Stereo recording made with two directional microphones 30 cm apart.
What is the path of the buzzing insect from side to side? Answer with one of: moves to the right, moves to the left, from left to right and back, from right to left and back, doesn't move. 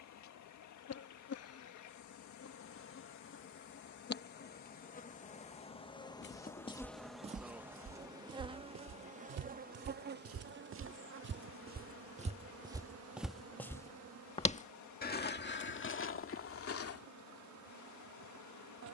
moves to the right.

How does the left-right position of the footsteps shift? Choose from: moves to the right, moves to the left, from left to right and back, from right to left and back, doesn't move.
from left to right and back.